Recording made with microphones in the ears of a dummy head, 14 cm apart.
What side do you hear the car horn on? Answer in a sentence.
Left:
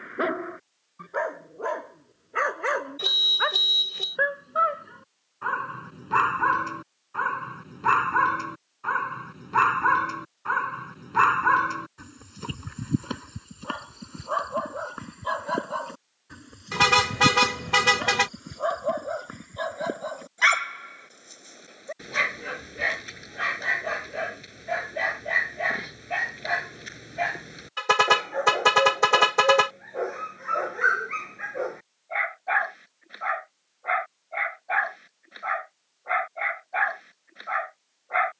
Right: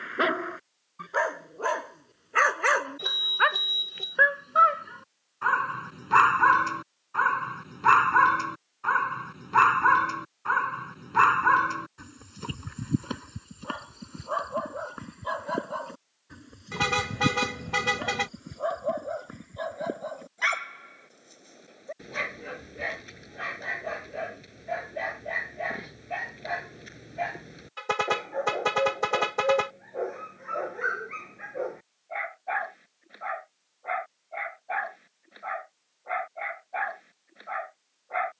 You can hear the car horn on the left.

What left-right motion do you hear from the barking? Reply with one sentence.
You can hear the barking move from right to left.